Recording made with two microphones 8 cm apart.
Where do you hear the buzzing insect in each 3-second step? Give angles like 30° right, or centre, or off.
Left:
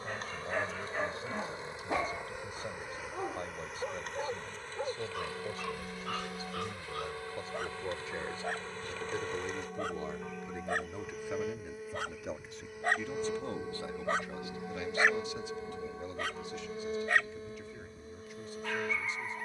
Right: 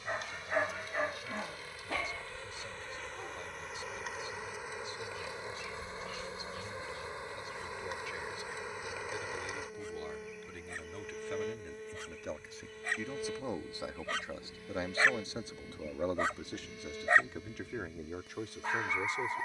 30° left, 10° right, 20° right, centre, 20° left, 30° left, 40° left.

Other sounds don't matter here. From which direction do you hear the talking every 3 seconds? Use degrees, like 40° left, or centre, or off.
40° left, 40° left, 30° left, 20° left, 20° right, 60° right, 80° right.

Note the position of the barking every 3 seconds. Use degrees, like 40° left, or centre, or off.
centre, 60° left, 80° left, 70° left, 40° left, 20° right, 30° right.